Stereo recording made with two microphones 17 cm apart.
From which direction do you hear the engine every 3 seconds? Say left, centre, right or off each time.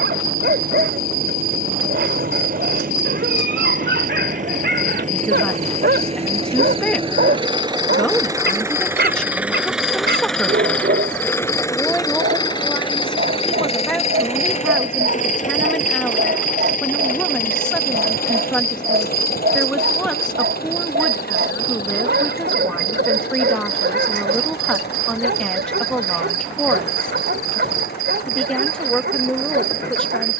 right, right, right, centre, left, left, left, left, left, left.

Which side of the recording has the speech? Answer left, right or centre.
centre.